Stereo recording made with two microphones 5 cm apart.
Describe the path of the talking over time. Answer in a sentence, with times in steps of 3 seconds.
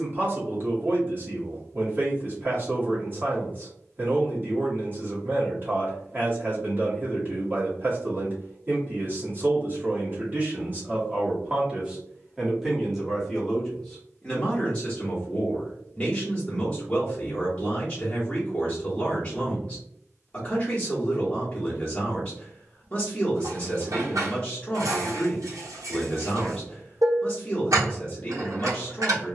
You can hear the talking on the right from 0 s, in the centre from 12 s and on the left from 15 s.